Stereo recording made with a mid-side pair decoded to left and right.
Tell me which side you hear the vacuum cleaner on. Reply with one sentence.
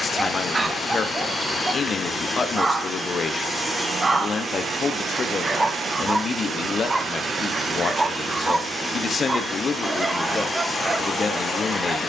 You can hear the vacuum cleaner in the centre.